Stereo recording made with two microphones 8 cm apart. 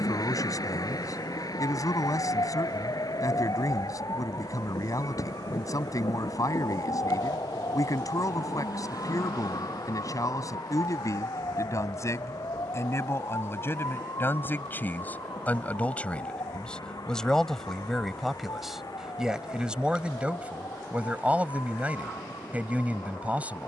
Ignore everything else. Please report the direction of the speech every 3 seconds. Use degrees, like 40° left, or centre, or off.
50° left, 50° left, 50° left, 50° left, 30° left, 10° left, 10° right, 20° right.